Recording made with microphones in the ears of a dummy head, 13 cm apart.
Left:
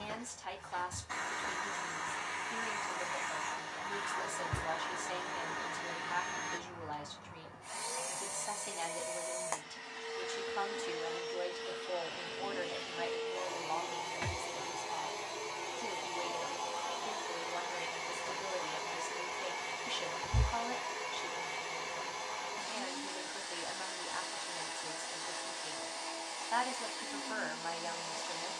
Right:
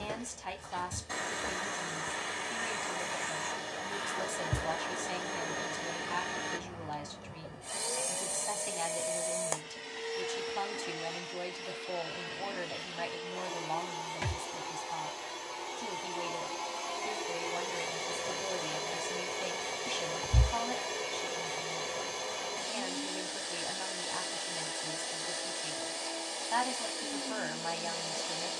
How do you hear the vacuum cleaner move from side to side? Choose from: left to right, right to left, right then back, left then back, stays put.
left then back.